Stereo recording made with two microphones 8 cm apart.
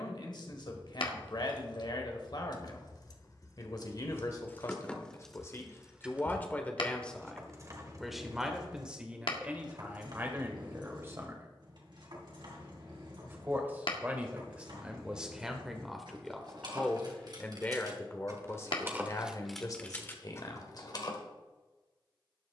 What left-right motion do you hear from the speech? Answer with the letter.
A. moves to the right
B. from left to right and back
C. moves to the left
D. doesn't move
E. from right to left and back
B.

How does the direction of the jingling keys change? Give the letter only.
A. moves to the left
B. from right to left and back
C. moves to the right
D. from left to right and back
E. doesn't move
D.